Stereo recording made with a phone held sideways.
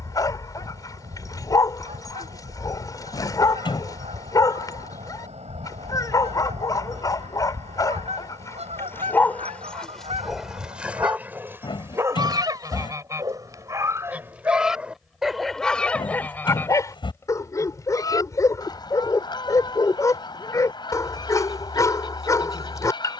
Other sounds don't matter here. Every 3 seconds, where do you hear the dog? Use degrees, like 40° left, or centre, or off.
20° left, 20° left, 20° left, centre, 20° right, 10° left, 20° left, 20° left.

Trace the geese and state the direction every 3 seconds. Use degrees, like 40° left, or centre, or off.
50° right, 50° right, 50° right, 40° right, 20° right, 10° left, 30° left, 30° left.